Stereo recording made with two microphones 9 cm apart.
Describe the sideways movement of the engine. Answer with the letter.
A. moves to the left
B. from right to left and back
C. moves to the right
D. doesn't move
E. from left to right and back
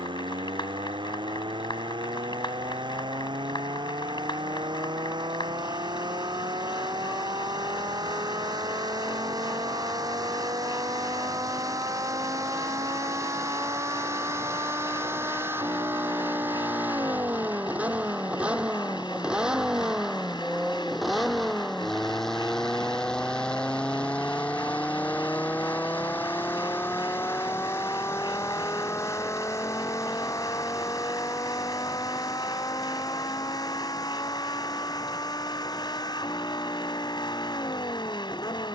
A.